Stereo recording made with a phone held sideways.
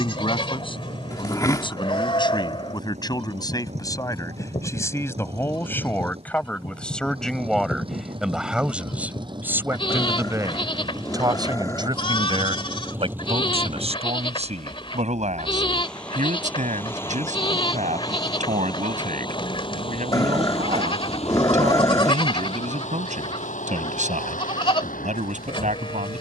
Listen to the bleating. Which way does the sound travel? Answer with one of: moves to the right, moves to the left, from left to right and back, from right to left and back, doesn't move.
doesn't move.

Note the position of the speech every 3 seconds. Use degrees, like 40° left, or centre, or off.
30° left, 20° left, centre, 20° right, 40° right, 50° right, 50° right, 50° right, 50° right.